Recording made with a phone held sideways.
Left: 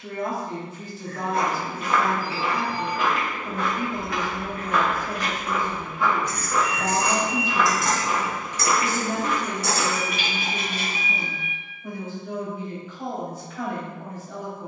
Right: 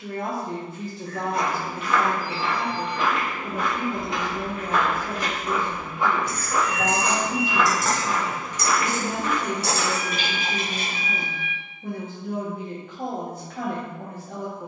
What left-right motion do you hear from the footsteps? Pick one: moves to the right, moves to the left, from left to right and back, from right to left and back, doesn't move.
from left to right and back.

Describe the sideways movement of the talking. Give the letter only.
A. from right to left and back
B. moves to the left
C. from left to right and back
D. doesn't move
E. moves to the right
D.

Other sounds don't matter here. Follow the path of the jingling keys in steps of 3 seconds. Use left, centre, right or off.
off, centre, centre, right, off.